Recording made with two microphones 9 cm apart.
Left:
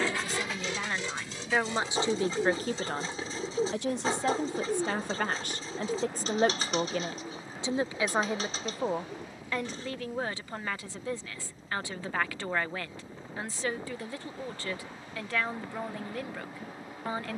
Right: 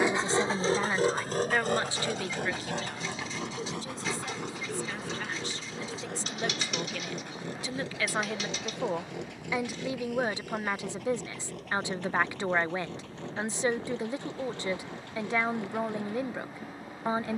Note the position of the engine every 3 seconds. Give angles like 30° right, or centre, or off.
50° right, 70° right, 80° right, 80° right, 80° right, 80° right.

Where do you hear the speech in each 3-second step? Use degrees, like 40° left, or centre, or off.
10° left, 60° left, 30° left, 20° right, 20° right, 20° right.